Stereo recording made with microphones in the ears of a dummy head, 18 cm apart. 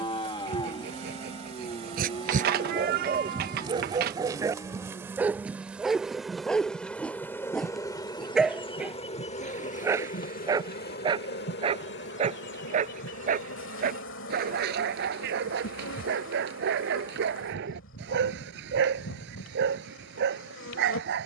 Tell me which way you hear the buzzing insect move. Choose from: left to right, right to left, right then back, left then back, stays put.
right to left.